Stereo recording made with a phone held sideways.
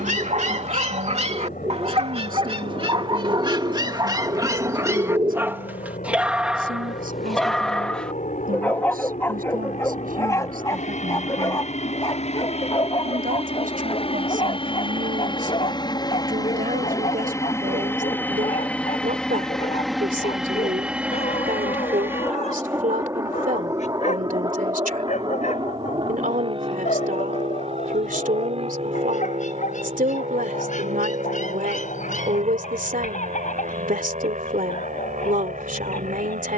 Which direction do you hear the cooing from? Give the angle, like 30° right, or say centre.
30° right.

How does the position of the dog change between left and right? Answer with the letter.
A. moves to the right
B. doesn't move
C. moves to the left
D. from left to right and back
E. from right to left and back
C.